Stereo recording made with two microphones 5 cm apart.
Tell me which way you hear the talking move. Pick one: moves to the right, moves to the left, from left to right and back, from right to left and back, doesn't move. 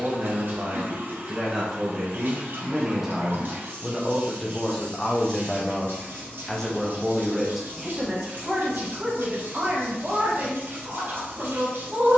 from right to left and back.